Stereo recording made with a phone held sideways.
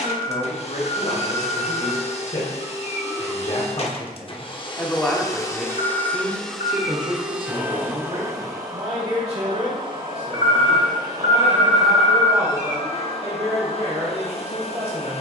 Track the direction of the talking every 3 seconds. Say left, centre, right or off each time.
left, left, right, right, right.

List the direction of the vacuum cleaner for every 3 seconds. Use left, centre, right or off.
left, left, centre, right, left.